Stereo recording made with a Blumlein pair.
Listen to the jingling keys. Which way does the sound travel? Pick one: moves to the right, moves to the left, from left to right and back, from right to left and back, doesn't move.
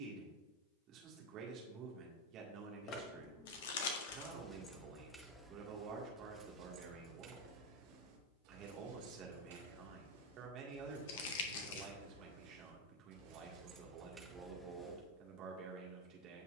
from left to right and back.